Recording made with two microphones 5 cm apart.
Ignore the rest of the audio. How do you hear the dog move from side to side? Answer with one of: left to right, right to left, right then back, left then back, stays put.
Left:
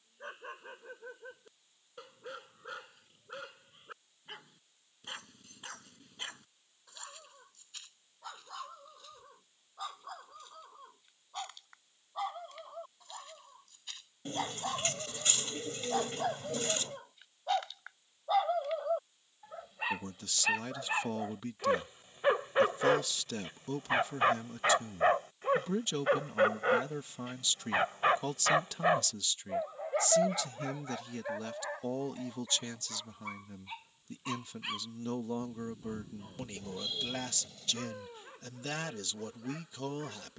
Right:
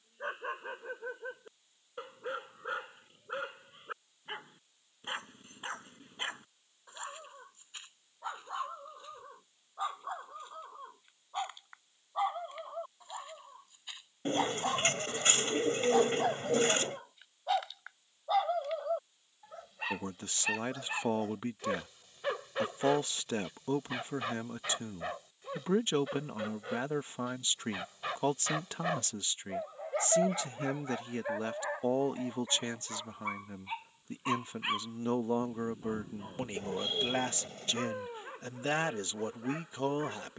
left then back.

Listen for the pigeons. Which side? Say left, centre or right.
right.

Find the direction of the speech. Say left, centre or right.
right.